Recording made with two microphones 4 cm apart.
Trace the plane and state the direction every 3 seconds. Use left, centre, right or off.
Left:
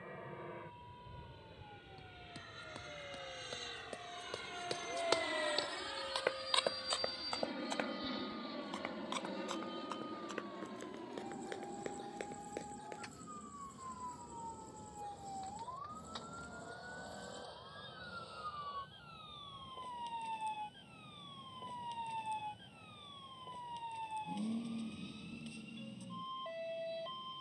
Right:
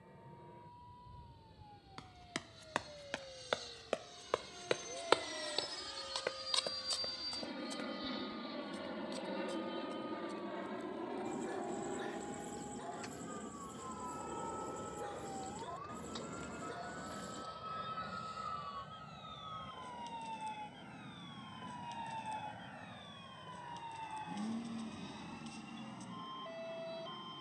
left, left, centre, right, right, right, right, right, right.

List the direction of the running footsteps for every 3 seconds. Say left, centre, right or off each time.
right, right, left, left, left, off, off, off, off.